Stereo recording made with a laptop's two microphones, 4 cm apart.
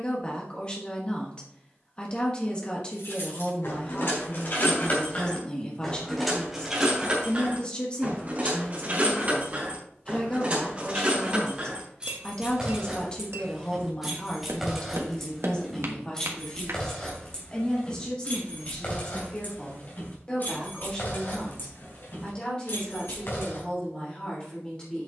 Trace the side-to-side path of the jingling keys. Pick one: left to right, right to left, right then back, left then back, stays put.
right then back.